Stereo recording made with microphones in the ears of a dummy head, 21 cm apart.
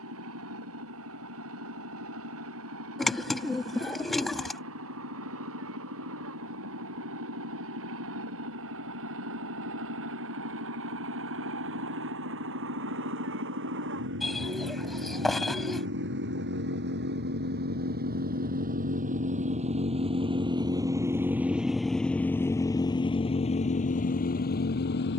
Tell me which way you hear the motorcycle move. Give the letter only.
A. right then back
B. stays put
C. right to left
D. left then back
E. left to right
C.